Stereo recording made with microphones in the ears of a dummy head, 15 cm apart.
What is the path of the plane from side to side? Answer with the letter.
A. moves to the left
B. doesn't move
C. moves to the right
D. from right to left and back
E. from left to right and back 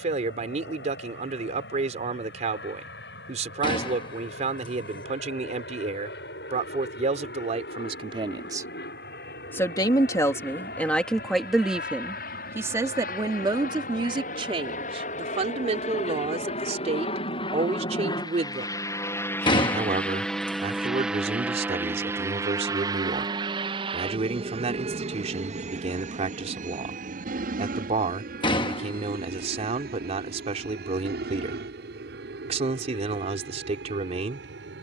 C.